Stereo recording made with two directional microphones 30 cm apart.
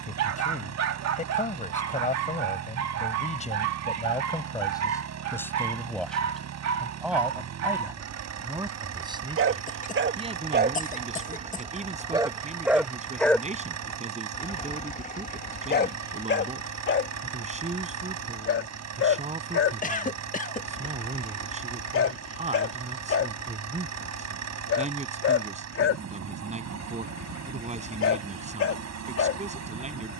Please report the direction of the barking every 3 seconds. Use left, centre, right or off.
right, right, right, right, centre, left, left, left, left, left.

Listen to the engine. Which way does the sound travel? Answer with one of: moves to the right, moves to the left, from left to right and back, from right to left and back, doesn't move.
doesn't move.